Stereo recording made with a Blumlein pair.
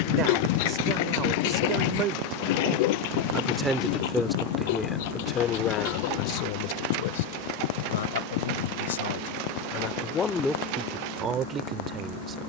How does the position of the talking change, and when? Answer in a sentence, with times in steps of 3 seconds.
You can hear the talking on the right from 0 s, in the centre from 3 s, on the left from 6 s and in the centre from 9 s.